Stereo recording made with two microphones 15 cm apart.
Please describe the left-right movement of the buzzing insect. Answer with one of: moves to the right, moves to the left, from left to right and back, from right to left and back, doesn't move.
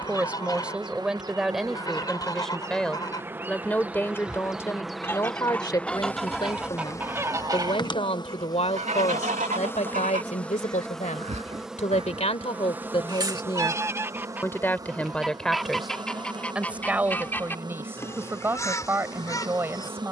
from right to left and back.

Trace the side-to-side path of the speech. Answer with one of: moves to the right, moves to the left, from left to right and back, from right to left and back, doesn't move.
from right to left and back.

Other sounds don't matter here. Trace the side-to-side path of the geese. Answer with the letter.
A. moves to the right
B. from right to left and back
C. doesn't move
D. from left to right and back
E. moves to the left
D.